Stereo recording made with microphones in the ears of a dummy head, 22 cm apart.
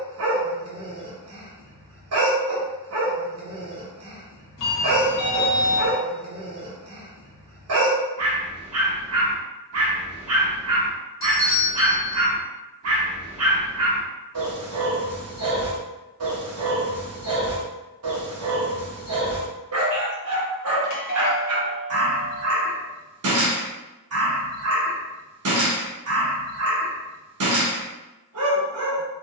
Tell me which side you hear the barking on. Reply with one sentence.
In this clip you hear the barking on the right.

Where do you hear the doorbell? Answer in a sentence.
You can hear the doorbell on the left.